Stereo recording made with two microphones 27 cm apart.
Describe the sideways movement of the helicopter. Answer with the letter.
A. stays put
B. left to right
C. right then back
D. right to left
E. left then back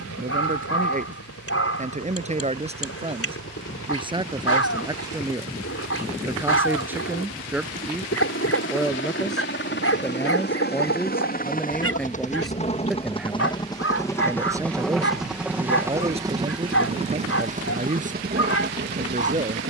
B.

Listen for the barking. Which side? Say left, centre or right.
left.